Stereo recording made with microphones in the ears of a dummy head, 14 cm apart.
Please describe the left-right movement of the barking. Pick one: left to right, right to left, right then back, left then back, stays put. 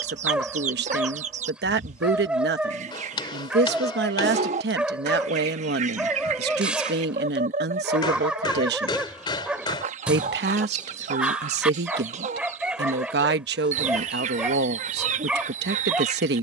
stays put.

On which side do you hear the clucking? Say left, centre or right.
right.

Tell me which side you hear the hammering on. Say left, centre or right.
left.